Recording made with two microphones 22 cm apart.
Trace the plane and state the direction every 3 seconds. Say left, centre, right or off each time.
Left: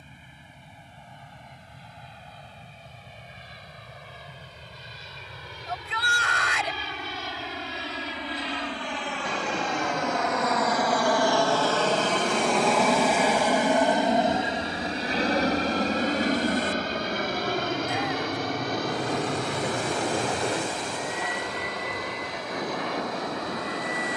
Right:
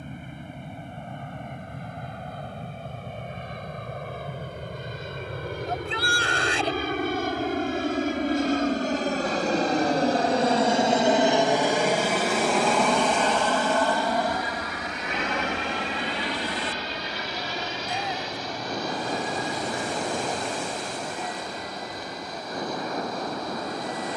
right, right, right, right, centre, left, left, left.